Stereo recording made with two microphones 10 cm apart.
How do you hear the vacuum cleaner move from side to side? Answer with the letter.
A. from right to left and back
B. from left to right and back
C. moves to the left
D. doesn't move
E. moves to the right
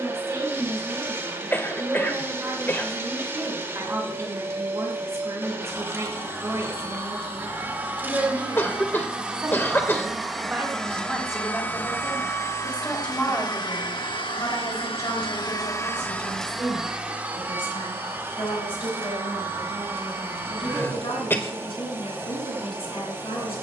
A.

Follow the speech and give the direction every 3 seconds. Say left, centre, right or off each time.
right, right, right, centre, left, left, left, left.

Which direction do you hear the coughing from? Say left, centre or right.
left.